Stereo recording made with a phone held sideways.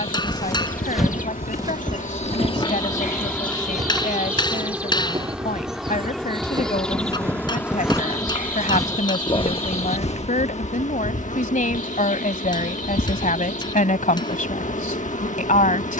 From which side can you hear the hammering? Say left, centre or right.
left.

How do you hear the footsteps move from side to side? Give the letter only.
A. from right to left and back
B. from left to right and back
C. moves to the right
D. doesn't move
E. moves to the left
B.